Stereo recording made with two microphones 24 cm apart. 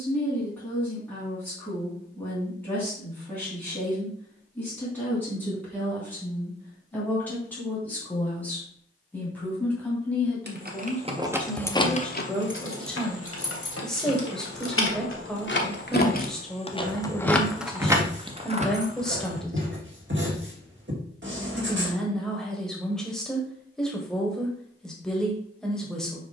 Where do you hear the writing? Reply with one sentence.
In this clip you hear the writing on the right.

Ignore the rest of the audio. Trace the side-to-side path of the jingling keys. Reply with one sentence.
You can hear the jingling keys go left and come back.